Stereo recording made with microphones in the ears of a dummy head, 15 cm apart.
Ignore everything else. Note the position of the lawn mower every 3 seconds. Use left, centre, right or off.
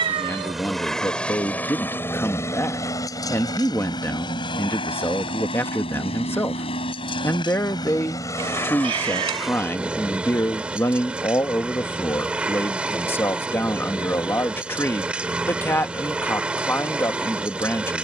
centre, left, left, centre, centre, centre.